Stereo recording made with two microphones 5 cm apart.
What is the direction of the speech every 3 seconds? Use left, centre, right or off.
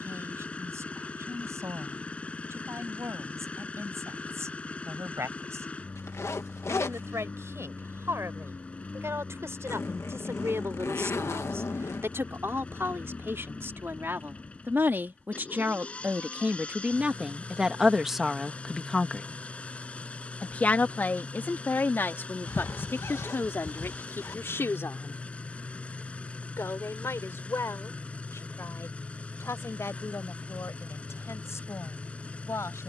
right, right, right, right, right, right, centre, left, left, left, left.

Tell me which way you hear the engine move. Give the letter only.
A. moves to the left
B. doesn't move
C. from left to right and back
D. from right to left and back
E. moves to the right
B.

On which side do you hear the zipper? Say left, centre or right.
left.